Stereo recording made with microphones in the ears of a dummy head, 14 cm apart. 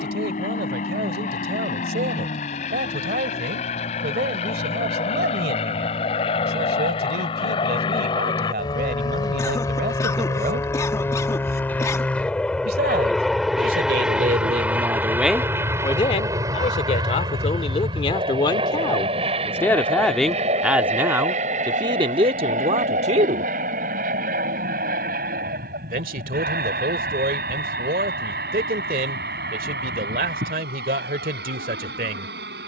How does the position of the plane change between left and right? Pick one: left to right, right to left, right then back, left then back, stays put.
left to right.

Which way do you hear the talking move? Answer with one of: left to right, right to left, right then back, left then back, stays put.
left then back.